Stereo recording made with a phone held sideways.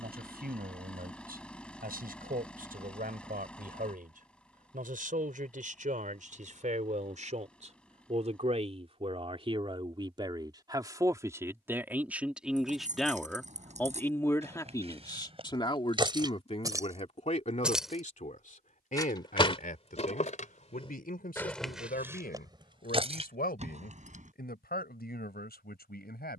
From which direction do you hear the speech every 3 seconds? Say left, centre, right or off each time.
right, right, right, right, centre, left, left, left, left.